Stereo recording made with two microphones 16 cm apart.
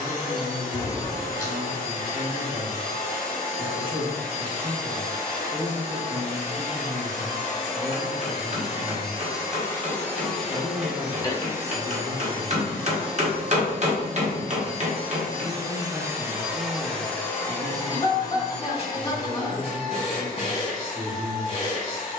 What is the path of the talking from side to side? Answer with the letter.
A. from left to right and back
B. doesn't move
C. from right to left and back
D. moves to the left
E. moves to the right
B.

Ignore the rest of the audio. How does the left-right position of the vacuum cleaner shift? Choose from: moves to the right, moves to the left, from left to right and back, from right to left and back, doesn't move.
from left to right and back.